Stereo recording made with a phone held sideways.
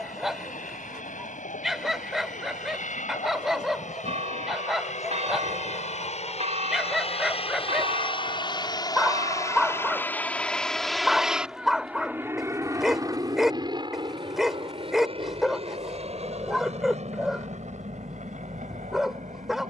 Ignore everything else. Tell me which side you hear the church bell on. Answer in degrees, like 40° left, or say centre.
50° right.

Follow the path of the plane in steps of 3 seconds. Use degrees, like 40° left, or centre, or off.
70° left, 60° left, 40° left, 10° left, 30° right, 50° right, 50° right.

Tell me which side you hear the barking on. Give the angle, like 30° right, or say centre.
centre.